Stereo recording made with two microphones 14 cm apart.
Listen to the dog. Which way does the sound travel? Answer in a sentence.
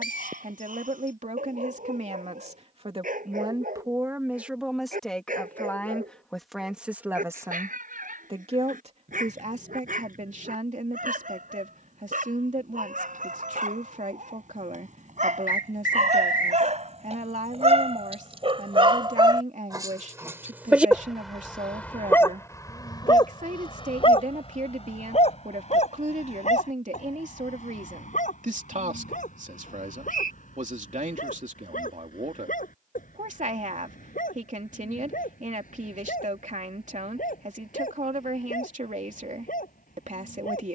You can hear the dog travel towards the left.